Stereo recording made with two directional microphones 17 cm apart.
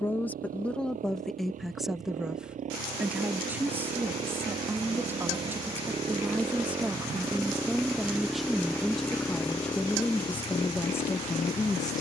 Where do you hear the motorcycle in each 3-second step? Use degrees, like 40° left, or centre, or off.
50° right, 40° right, 10° right, 30° left.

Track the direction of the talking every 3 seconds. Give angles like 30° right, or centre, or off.
centre, 10° right, centre, 10° left.